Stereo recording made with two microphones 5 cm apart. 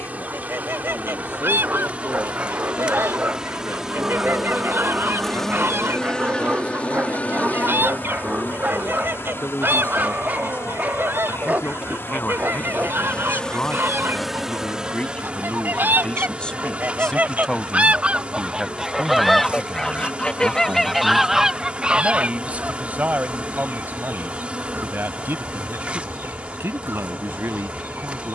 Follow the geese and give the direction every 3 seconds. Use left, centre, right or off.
right, right, right, right, right, right, centre, right, right, right.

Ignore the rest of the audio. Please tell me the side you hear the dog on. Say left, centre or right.
right.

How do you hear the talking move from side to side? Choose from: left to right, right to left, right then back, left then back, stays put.
left to right.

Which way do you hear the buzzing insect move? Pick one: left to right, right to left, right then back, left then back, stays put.
left then back.